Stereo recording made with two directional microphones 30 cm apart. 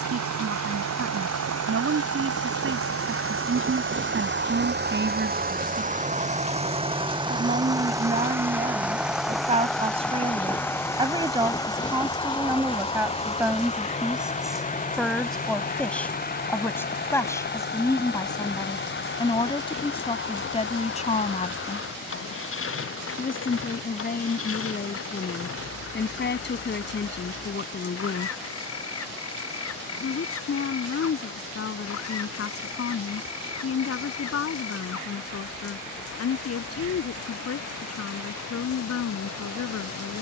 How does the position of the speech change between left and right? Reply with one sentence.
In this clip you hear the speech go from the right side to the left.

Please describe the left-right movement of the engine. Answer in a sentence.
You can hear the engine go from the right side to the left.